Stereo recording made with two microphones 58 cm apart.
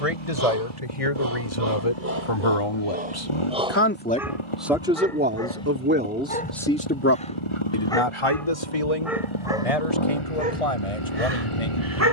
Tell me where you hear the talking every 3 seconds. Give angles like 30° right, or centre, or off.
60° left, centre, 30° left, 80° left.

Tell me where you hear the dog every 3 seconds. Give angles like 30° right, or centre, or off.
20° right, centre, 10° left, 10° right.